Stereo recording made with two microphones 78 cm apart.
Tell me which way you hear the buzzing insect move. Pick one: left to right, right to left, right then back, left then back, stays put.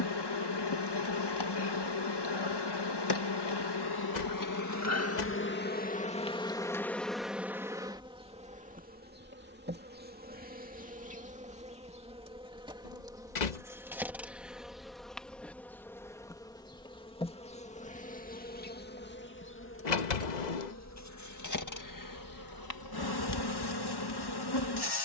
right then back.